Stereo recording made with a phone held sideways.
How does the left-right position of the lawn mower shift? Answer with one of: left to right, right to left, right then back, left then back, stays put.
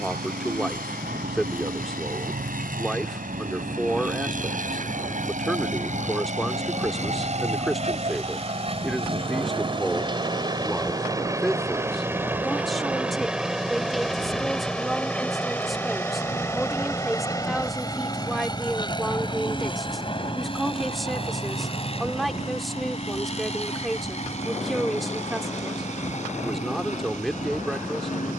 right to left.